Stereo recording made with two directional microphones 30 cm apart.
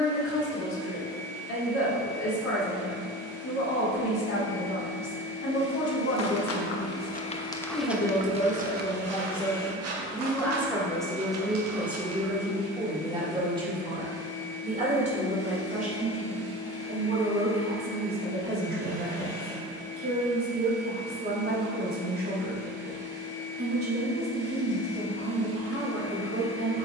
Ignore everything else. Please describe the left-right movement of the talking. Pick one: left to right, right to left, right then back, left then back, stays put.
left to right.